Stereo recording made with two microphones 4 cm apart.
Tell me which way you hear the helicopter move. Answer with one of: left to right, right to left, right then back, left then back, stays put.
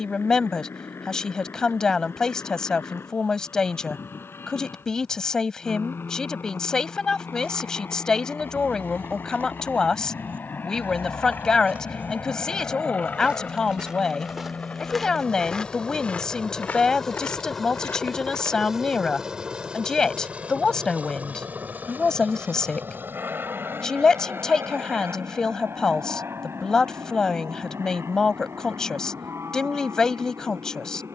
left to right.